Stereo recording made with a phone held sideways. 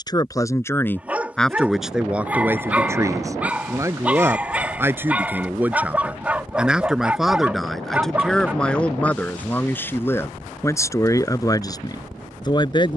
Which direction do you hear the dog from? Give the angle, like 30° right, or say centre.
10° right.